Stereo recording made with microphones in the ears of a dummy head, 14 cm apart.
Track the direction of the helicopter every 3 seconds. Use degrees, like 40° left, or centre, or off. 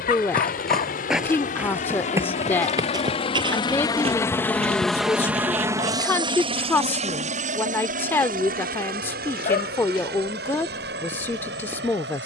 50° left, 10° left, 50° right, 70° right.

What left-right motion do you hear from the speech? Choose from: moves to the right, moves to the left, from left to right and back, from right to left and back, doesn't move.
doesn't move.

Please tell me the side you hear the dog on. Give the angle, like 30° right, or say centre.
60° left.